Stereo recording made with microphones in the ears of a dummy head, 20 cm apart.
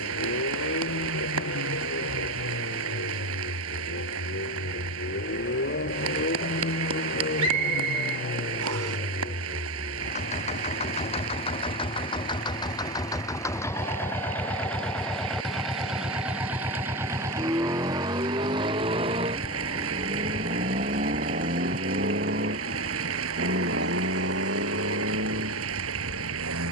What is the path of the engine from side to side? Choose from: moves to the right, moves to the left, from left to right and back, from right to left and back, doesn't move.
moves to the right.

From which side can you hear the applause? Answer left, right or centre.
right.